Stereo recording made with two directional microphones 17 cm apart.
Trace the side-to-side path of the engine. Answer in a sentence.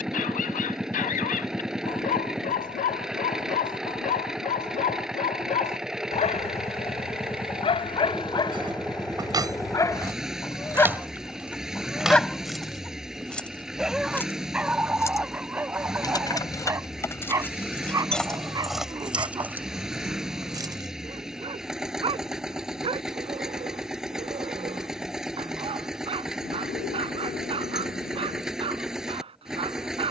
You can hear the engine stay in one place.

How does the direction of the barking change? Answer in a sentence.
You can hear the barking move from left to right.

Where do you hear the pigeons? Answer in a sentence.
In this clip you hear the pigeons on the left.